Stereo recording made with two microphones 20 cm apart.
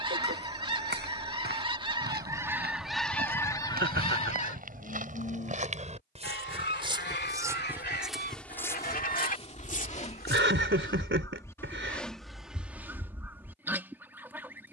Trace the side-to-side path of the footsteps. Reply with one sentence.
In this clip you hear the footsteps go from the right side to the left.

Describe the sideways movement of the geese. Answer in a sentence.
In this clip you hear the geese move from right to left and back again.